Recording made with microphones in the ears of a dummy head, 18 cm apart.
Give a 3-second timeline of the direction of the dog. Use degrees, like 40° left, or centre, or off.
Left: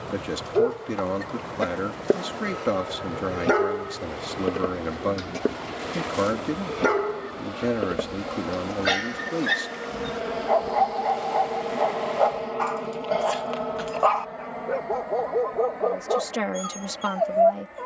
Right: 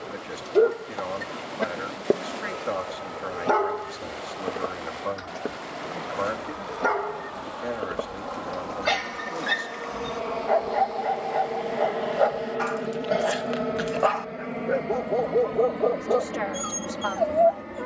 centre, 30° left, 30° left, 10° right, 20° right, 20° right.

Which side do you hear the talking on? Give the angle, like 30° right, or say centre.
50° left.